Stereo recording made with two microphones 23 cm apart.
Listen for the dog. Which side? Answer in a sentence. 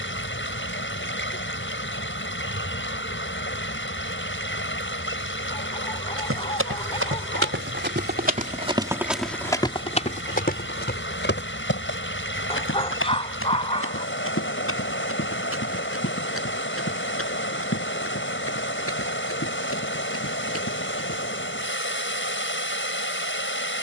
You can hear the dog on the left.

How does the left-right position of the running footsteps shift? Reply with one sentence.
In this clip you hear the running footsteps go from the right side to the left.